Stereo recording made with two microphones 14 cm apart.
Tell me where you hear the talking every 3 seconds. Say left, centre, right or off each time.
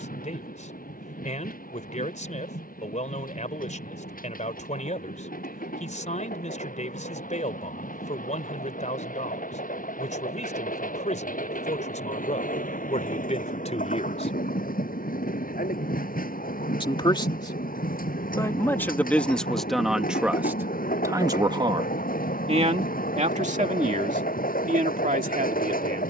left, left, left, left, left, left, centre, right, right.